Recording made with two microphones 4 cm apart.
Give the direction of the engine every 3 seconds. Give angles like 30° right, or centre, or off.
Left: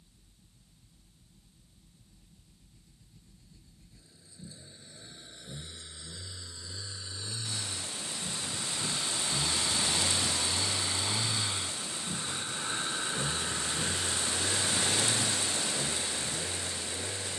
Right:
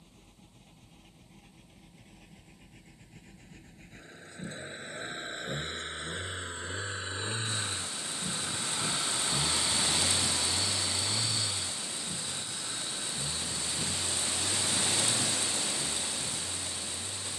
70° right, 60° right, 40° right, centre, 40° left, 60° left.